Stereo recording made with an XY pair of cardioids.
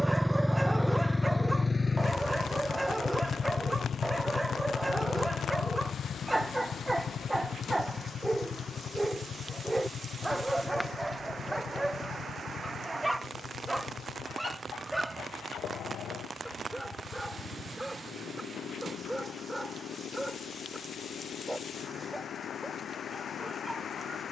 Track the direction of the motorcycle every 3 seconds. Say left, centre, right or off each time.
centre, left, left, left, left, left, left, left.